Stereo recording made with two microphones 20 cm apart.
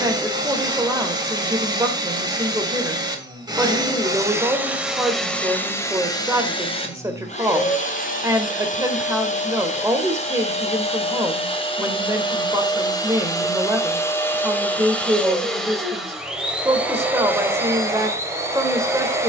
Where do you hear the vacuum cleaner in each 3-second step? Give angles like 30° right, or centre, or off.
20° right, 10° right, 30° left, 30° left, 20° left, centre, 10° right.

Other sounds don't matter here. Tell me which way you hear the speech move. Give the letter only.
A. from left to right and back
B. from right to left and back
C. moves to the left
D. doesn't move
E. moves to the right
D.